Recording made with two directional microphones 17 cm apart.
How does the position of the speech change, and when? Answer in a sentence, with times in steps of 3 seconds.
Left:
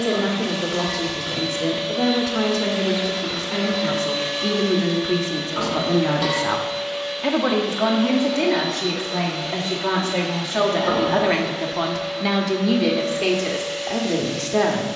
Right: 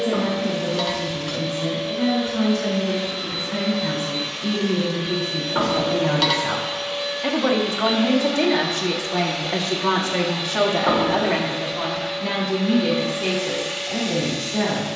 You can hear the speech on the left from 0 s, in the centre from 6 s and on the left from 12 s.